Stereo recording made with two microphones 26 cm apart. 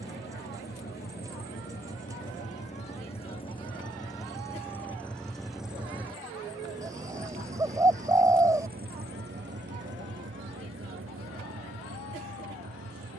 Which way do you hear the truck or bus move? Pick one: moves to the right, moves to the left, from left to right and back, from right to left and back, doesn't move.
moves to the right.